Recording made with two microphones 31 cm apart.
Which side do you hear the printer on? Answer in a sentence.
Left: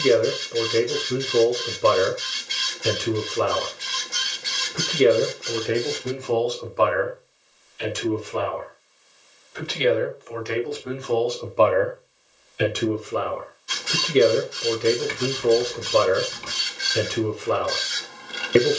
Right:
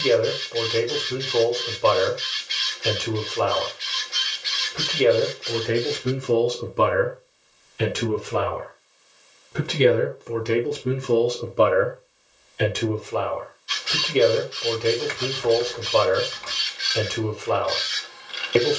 You can hear the printer on the left.